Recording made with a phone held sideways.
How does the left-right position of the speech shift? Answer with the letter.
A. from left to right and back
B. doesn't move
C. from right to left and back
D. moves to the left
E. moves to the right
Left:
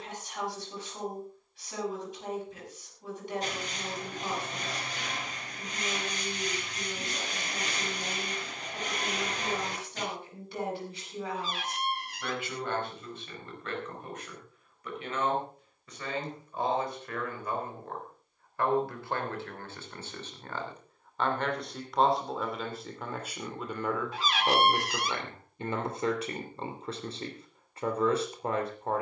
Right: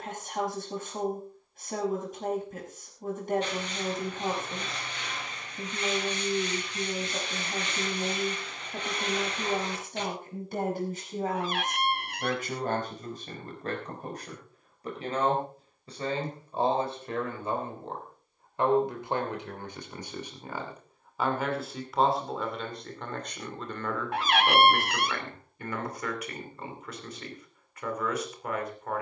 D.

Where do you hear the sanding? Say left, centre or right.
left.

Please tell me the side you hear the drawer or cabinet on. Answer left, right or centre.
right.